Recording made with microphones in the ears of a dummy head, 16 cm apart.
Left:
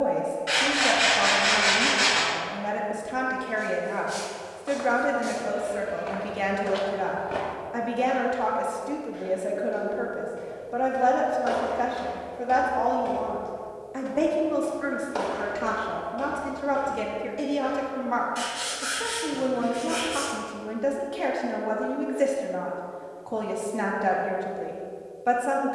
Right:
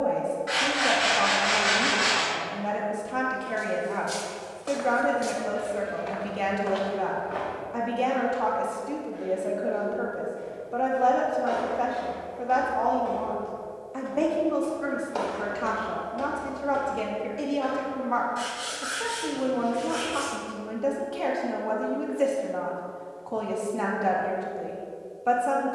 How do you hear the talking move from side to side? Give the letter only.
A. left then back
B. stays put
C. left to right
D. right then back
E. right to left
B.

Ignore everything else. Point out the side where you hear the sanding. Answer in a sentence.
In this clip you hear the sanding on the left.